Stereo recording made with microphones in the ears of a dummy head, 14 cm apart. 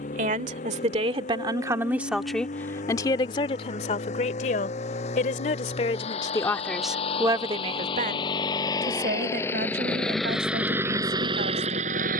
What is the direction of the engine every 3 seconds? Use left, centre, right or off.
left, left, left, centre.